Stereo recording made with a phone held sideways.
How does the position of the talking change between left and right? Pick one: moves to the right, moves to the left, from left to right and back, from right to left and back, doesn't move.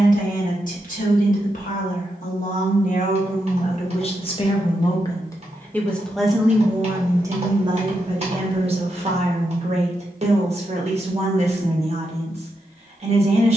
moves to the right.